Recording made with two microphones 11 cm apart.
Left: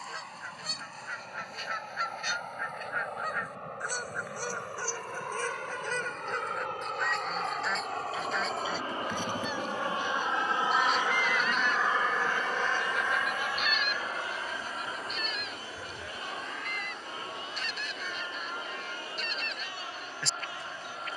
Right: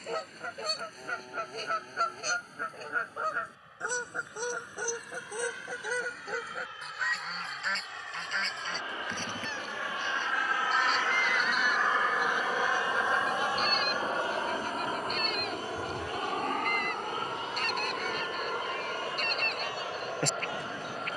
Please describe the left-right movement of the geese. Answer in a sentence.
You can hear the geese go left and come back.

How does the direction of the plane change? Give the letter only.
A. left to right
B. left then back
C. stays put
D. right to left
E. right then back
A.